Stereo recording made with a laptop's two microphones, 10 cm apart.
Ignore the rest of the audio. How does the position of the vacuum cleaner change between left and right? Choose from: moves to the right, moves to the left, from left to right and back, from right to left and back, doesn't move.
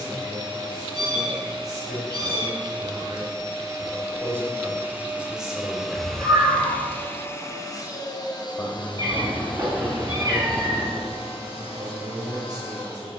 moves to the left.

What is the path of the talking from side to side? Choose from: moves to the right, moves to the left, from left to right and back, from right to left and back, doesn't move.
from right to left and back.